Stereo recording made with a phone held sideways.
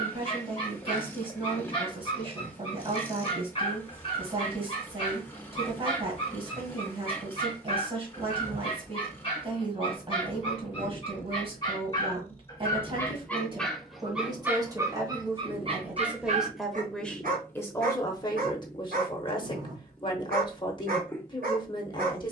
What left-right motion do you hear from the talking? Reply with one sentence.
You can hear the talking travel towards the left.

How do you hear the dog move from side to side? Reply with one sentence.
You can hear the dog move from left to right.